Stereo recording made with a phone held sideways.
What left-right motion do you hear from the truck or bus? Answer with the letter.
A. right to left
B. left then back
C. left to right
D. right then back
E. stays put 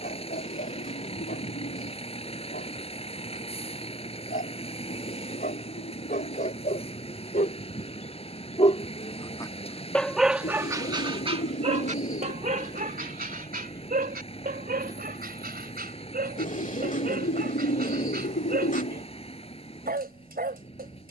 E.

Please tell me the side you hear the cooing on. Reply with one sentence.
You can hear the cooing on the left.